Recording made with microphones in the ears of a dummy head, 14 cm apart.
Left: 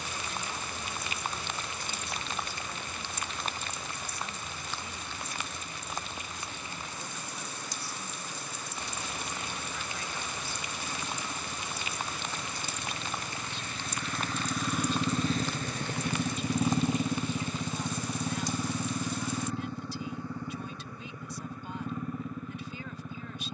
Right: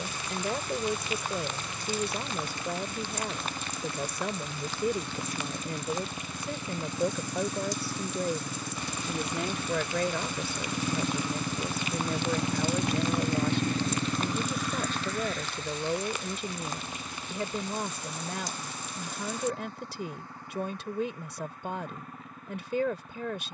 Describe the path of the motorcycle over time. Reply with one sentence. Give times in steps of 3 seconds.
You can hear the motorcycle on the right from 0 s and on the left from 15 s.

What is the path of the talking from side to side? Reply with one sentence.
You can hear the talking stay in one place.